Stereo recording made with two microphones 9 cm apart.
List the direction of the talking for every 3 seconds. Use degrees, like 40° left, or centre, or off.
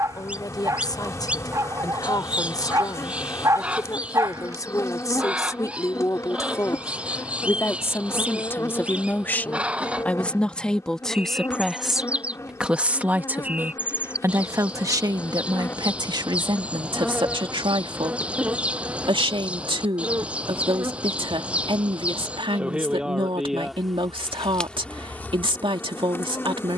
50° left, 40° left, 30° left, 10° left, 20° right, 50° right, 70° right, 70° right, 70° right.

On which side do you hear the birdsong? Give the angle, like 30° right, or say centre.
10° right.